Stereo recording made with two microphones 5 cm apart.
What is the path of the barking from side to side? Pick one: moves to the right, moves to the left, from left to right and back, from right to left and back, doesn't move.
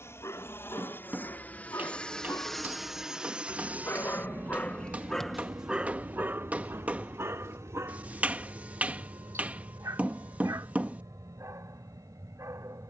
moves to the right.